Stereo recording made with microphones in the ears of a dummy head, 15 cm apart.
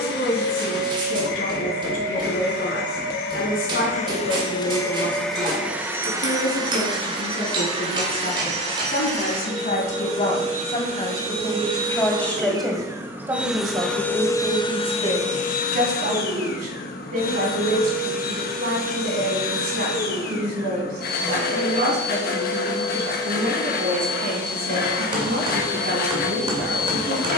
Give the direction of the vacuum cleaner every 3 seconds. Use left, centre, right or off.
left, left, right, right, centre, left, left, left, left.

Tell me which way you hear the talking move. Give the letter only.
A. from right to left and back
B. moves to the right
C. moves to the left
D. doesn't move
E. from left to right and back
B.